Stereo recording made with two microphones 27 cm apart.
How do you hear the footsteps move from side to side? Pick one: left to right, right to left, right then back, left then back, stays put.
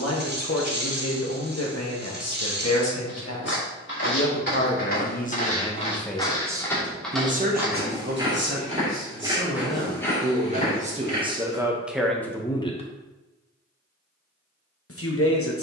right then back.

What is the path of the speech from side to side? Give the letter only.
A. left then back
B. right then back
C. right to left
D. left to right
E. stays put
B.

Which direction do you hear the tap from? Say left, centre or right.
right.